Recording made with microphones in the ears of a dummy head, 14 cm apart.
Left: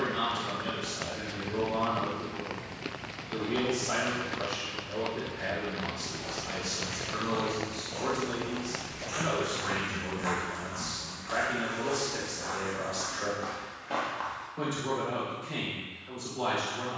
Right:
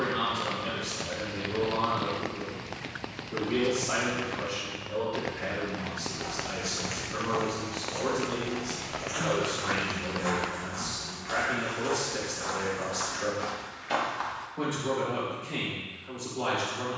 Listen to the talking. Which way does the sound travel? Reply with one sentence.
In this clip you hear the talking stay in one place.